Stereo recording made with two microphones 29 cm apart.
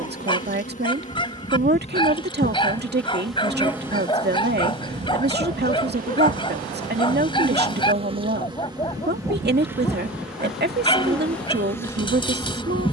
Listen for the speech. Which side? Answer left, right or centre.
right.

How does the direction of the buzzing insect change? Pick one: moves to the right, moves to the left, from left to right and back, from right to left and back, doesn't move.
from left to right and back.